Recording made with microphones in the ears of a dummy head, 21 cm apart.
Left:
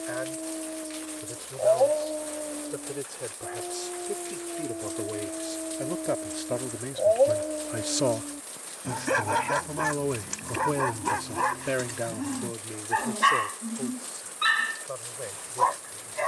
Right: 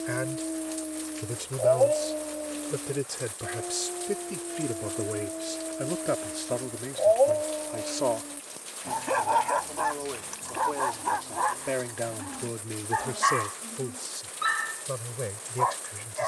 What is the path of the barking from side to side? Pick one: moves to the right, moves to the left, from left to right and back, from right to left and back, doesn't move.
moves to the left.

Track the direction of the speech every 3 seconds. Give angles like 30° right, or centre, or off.
40° right, 20° right, 10° left, 40° left, 20° right, 40° right.